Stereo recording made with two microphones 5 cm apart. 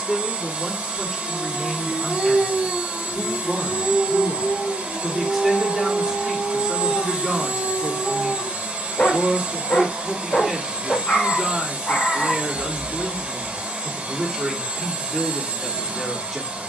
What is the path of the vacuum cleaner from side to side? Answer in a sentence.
You can hear the vacuum cleaner stay put.